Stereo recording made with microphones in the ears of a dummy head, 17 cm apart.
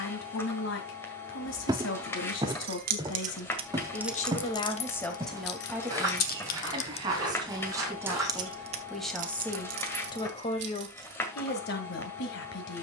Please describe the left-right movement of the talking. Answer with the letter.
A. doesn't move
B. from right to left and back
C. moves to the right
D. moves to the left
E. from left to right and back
E.